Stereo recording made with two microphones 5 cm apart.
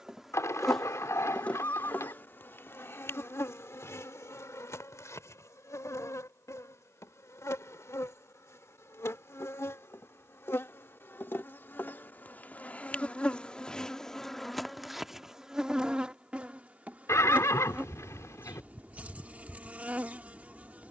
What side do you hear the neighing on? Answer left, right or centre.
left.